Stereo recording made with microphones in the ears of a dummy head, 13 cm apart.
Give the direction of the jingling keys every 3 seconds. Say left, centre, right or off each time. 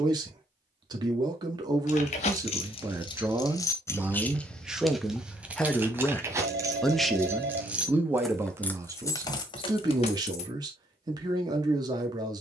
left, centre, centre, left.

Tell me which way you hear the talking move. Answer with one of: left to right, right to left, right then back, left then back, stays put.
left then back.